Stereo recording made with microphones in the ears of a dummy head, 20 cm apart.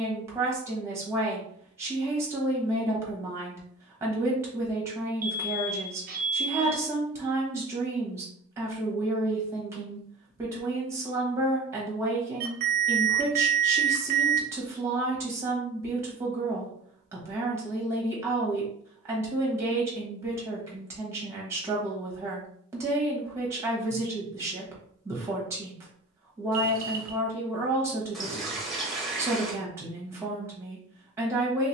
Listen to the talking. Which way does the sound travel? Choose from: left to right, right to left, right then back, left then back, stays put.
stays put.